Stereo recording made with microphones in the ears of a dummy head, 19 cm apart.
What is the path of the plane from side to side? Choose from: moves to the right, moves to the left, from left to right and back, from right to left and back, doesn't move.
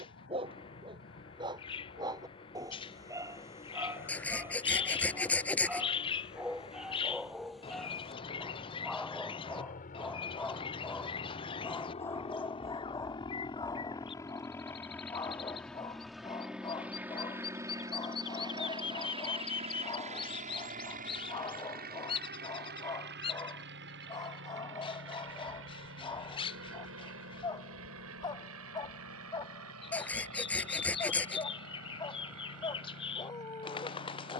moves to the right.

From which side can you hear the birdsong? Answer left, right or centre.
left.